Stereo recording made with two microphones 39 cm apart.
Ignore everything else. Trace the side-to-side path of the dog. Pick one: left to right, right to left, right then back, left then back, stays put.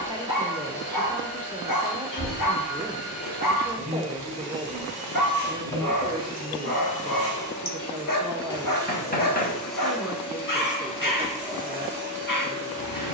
stays put.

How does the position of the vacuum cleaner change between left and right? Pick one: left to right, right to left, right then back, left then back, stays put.
left to right.